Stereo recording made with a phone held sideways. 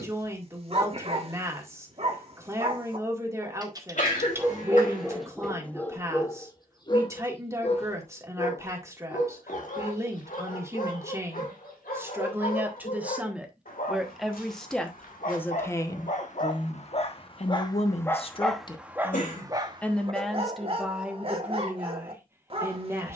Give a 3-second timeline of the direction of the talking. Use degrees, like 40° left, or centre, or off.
20° right, 20° right, 20° right, 20° right, 10° right, 30° left, 20° left, 10° right.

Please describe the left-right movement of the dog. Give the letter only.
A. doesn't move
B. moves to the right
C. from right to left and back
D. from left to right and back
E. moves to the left
C.